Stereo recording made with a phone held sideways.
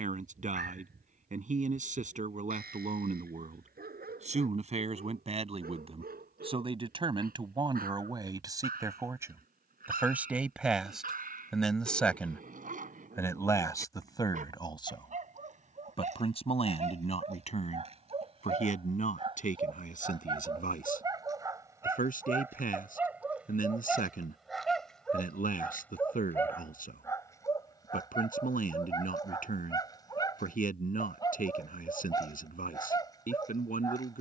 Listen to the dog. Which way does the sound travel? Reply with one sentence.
You can hear the dog go from the right side to the left.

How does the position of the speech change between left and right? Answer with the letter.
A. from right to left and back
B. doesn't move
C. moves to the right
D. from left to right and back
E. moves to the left
E.